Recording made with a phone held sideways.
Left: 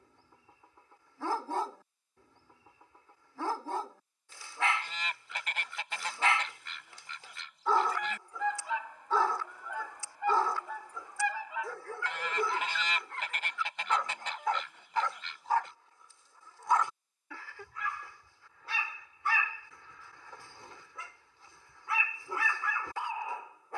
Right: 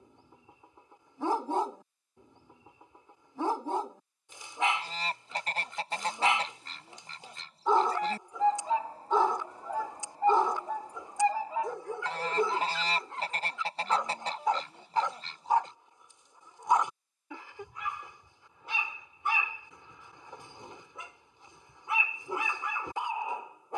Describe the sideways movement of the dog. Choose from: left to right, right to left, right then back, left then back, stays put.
stays put.